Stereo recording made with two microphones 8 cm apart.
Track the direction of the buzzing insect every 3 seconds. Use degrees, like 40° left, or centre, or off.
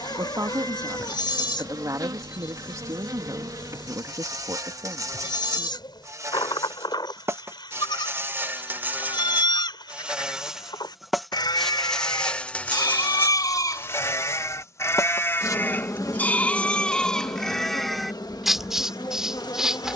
60° right, 50° right, 30° right, 10° right, 30° left, 50° left, 60° left.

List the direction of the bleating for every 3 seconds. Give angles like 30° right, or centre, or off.
80° left, 80° left, 80° left, 70° left, 50° left, 20° left, 10° right.